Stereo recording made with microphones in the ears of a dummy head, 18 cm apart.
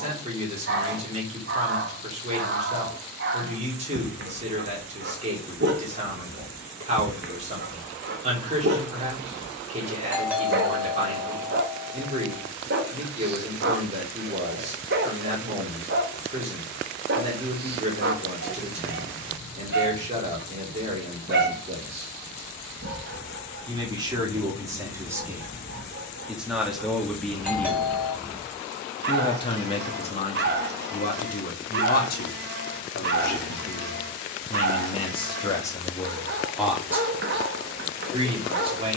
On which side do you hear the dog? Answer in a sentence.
In this clip you hear the dog on the right.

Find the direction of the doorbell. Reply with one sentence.
You can hear the doorbell in the centre.